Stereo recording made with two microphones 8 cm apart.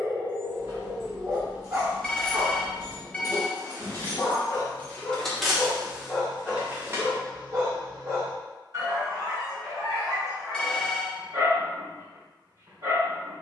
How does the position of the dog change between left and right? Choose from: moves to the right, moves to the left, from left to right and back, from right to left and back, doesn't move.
from right to left and back.